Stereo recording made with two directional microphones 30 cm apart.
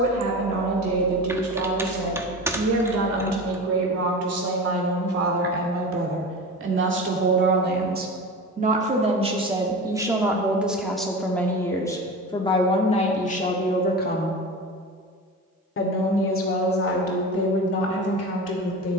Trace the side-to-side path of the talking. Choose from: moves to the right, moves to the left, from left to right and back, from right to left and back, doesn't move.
moves to the left.